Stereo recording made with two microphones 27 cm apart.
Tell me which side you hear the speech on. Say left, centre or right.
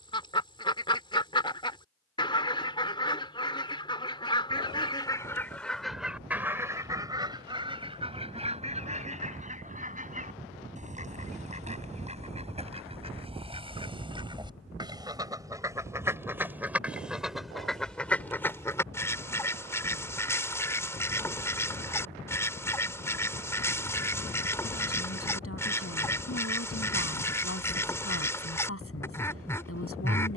left.